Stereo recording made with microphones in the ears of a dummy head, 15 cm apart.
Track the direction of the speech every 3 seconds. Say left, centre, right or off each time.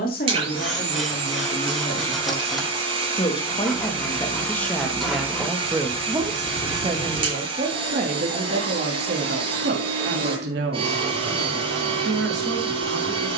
left, centre, right, right, right.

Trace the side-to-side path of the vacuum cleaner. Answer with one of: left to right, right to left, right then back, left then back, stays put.
stays put.